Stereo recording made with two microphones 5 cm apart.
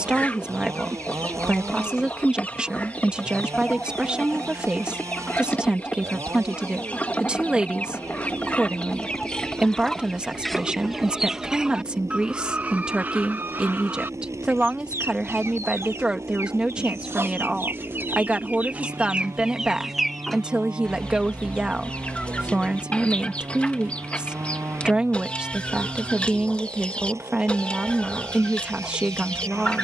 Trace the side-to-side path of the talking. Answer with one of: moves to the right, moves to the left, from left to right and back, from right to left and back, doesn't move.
doesn't move.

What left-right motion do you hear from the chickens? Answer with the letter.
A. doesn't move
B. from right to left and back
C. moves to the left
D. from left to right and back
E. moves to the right
D.